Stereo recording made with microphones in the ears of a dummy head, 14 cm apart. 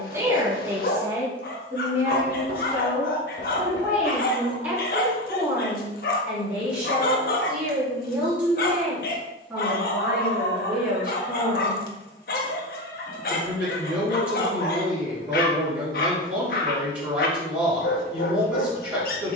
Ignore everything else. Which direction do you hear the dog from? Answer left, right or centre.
left.